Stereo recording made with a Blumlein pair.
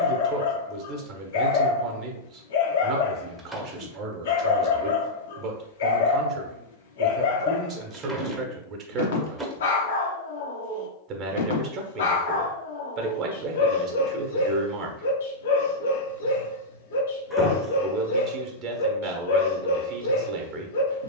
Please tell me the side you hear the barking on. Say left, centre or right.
left.